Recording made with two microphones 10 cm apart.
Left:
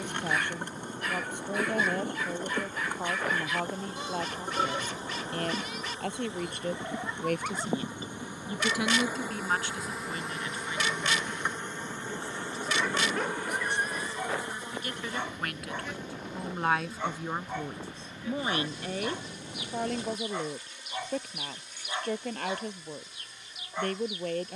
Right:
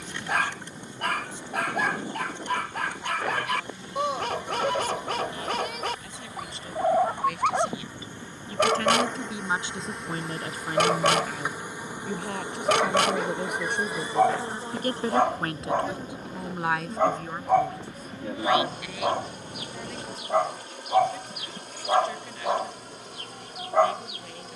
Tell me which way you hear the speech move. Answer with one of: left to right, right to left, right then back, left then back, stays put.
right then back.